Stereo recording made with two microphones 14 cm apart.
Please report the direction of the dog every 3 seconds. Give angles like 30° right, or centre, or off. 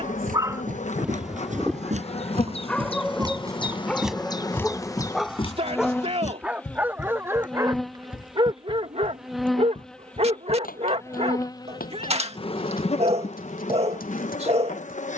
centre, centre, 20° right, 50° right, 50° right.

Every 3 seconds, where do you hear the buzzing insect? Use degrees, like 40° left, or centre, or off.
50° left, 30° left, centre, 10° left, 50° left.